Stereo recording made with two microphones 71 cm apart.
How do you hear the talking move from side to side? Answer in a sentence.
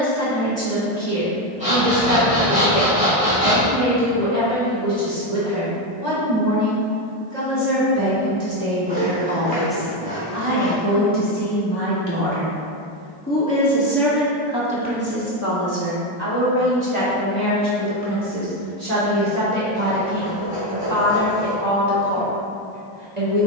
In this clip you hear the talking move from right to left and back again.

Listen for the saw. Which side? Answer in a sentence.
You can hear the saw in the centre.